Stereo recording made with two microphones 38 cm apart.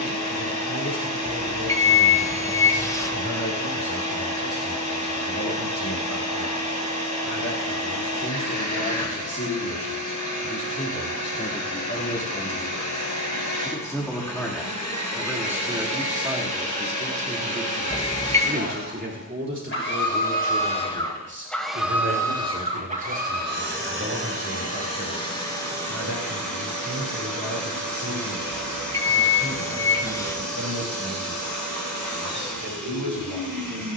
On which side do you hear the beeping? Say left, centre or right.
centre.